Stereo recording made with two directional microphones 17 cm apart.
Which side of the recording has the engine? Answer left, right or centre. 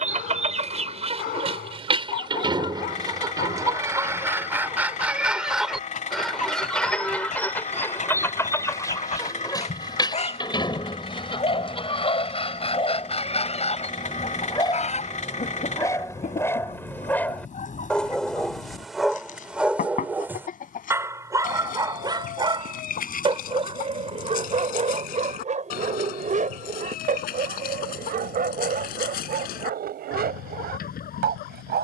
left.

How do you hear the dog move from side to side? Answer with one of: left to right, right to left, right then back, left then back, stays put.
left to right.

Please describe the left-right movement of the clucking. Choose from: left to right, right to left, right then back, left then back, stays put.
right to left.